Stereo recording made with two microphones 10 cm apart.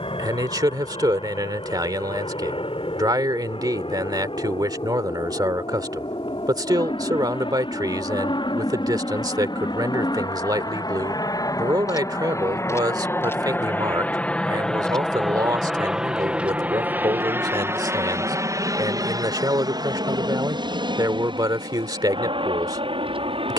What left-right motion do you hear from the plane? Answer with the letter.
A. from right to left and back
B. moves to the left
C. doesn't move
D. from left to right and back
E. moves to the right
E.